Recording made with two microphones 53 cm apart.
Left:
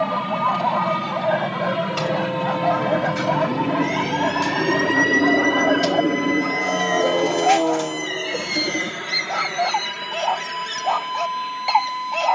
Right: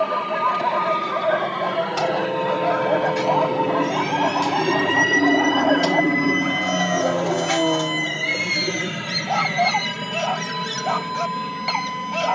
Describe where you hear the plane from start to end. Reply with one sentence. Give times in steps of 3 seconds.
In this clip you hear the plane on the left from 0 s, in the centre from 3 s and on the right from 6 s.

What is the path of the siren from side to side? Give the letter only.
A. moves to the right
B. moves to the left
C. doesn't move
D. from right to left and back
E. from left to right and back
A.